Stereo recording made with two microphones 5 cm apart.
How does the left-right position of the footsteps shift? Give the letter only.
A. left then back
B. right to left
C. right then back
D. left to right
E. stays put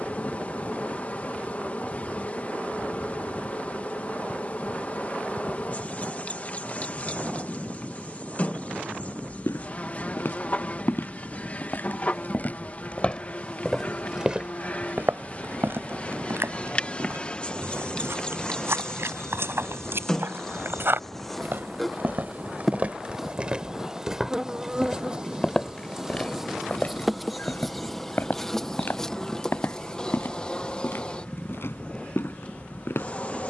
C.